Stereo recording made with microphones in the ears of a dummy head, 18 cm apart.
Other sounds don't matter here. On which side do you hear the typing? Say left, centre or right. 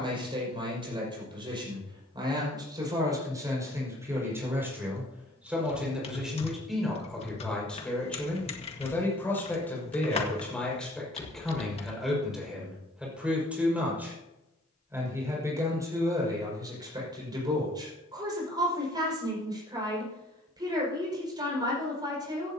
left.